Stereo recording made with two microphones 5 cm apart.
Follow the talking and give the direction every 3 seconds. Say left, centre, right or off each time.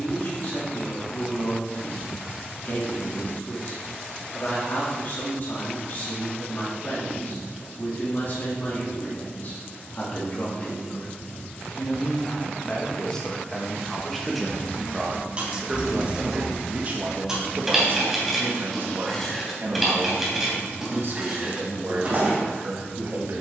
left, left, left, left, centre, right, right, right.